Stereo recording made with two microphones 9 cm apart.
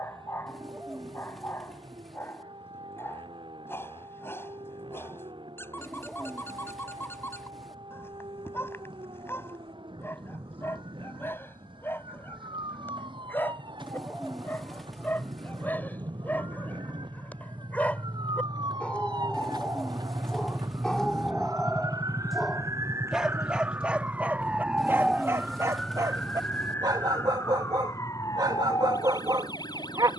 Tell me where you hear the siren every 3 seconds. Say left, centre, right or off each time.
right, right, right, right, right, right, right, right, centre, left.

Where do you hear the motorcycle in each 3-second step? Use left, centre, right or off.
right, right, right, right, right, right, right, left, left, left.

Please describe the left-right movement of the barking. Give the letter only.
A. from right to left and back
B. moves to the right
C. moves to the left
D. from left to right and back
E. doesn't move
B.